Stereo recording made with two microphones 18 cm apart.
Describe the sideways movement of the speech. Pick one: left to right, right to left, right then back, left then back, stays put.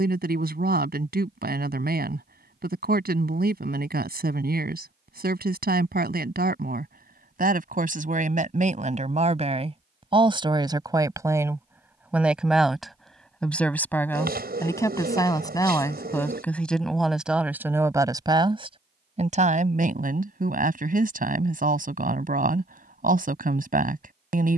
left then back.